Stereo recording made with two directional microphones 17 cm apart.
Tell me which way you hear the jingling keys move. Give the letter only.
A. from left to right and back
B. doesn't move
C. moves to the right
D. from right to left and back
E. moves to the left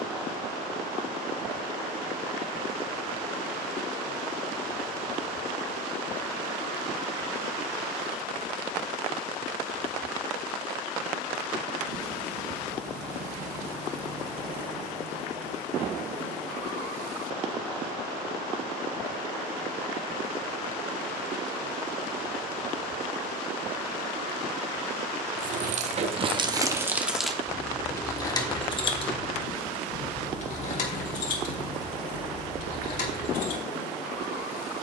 E.